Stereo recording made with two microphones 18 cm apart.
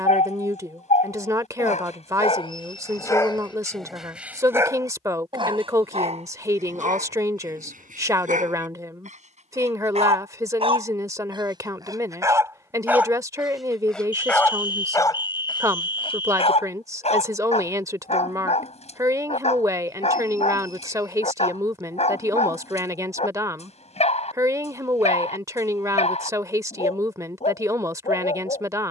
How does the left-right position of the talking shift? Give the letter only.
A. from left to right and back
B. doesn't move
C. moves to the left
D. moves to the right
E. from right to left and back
B.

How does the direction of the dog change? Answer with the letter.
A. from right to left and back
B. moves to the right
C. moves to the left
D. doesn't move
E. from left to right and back
E.